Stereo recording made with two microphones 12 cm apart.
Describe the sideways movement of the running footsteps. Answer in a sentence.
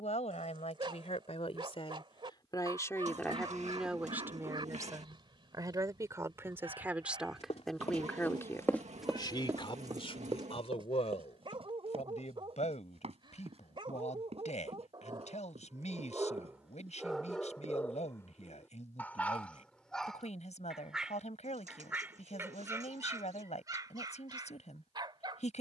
You can hear the running footsteps move from left to right.